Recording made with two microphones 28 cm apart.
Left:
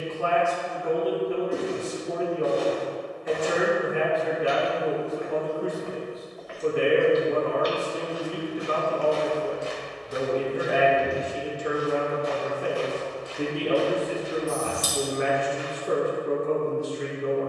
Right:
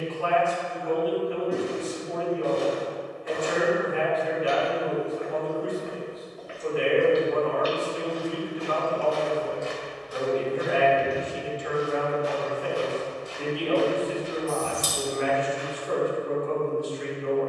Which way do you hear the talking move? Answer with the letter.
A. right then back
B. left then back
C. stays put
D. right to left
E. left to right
C.